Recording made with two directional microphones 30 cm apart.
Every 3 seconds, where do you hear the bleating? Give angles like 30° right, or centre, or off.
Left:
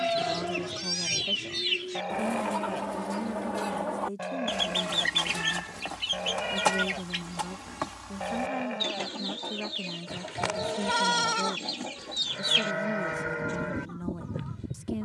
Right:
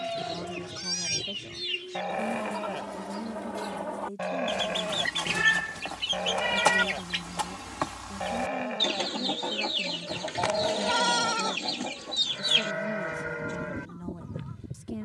centre, 20° right, 10° right, 10° left, 20° left.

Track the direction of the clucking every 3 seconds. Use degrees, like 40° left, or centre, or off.
40° left, 20° left, 10° right, 30° right, 20° left.